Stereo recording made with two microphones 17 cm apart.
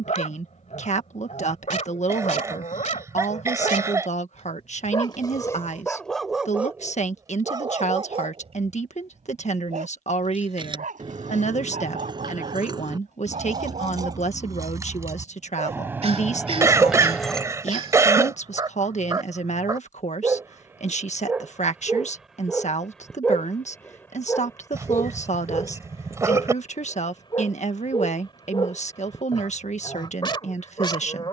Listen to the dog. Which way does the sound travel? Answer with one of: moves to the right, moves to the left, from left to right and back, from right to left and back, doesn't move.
from left to right and back.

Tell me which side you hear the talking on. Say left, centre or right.
left.